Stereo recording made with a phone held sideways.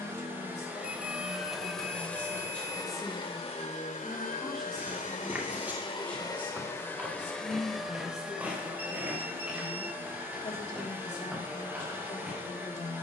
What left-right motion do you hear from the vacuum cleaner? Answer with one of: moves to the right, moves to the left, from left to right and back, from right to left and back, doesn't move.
from right to left and back.